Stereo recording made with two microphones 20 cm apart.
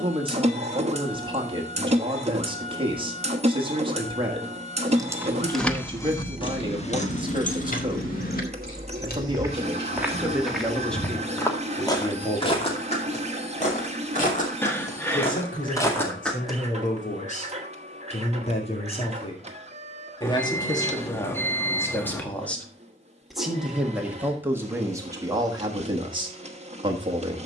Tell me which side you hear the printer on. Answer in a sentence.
In this clip you hear the printer on the right.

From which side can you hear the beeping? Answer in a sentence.
You can hear the beeping in the centre.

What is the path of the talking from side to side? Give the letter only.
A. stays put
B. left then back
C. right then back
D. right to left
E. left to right
B.